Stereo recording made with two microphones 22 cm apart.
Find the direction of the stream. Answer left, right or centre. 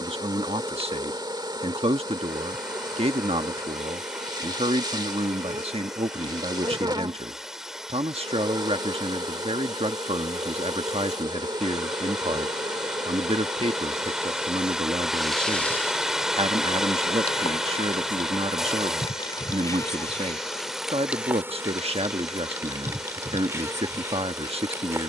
centre.